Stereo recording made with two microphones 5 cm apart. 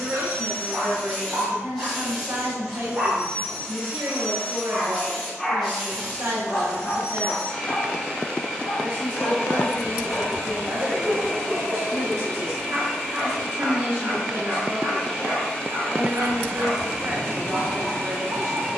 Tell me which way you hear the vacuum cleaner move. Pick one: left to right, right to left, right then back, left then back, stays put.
stays put.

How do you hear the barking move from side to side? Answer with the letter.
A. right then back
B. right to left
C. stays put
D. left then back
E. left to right
D.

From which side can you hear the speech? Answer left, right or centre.
right.